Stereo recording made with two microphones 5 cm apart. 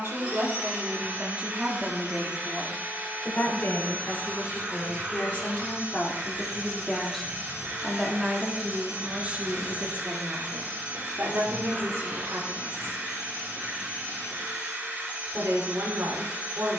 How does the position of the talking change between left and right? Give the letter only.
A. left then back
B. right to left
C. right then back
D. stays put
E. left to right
A.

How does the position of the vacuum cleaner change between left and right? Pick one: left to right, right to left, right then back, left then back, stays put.
stays put.